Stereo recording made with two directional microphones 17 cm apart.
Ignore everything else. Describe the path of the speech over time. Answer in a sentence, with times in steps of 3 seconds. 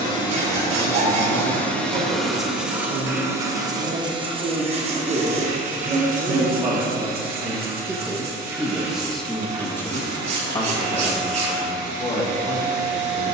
You can hear the speech on the right from 0 s and on the left from 9 s.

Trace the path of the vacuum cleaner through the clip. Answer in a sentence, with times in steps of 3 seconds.
You can hear the vacuum cleaner in the centre from 0 s and on the right from 3 s.